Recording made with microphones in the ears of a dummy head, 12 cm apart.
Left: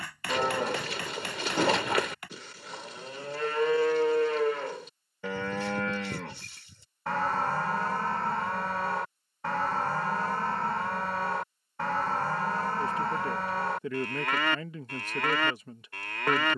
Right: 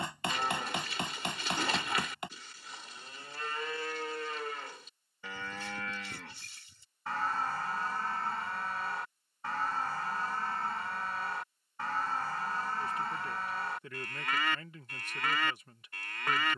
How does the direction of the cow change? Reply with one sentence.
In this clip you hear the cow stay put.